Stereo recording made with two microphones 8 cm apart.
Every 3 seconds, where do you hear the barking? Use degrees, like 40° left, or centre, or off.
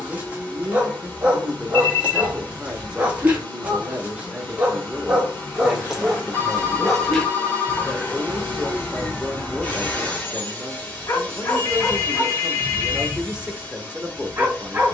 20° right, 20° right, 10° left, 30° left, 10° right.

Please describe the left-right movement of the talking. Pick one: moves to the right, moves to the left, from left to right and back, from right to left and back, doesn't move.
doesn't move.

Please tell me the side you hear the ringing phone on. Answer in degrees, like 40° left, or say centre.
30° left.